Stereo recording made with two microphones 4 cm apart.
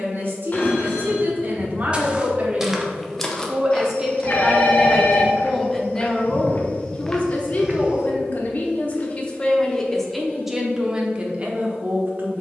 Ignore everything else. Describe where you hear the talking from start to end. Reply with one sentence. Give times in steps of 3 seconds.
You can hear the talking on the right from 0 s, in the centre from 3 s, on the left from 6 s and in the centre from 9 s.